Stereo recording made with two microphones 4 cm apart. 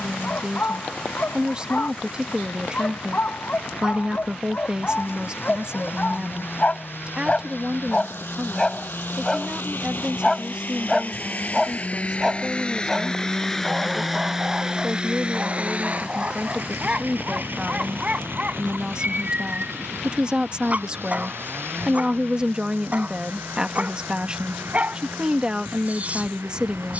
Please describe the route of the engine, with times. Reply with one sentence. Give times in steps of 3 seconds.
You can hear the engine on the left from 0 s, in the centre from 12 s and on the right from 15 s.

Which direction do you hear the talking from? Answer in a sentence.
In this clip you hear the talking on the right.